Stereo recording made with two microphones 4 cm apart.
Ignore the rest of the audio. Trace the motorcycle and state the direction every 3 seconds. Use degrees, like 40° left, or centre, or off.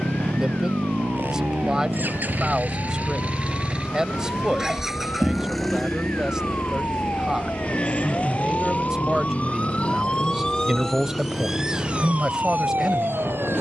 50° right, 10° right, 30° left, 50° left, 50° left.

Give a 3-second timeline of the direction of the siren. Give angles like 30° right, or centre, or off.
60° left, 60° left, 50° left, 20° left, 50° right.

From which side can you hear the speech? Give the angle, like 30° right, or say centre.
20° right.